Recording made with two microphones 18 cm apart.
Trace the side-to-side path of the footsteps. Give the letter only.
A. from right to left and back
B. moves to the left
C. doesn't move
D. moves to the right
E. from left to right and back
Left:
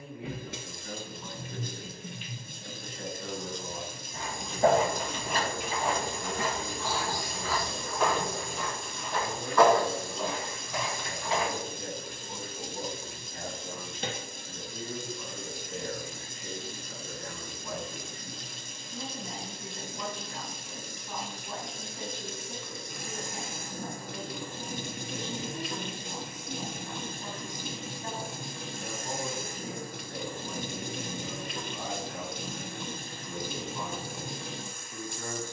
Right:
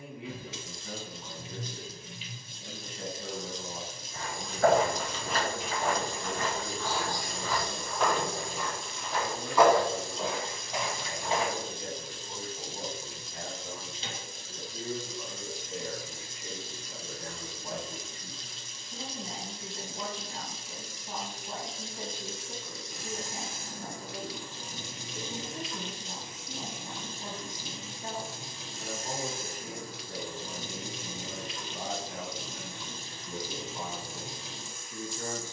D.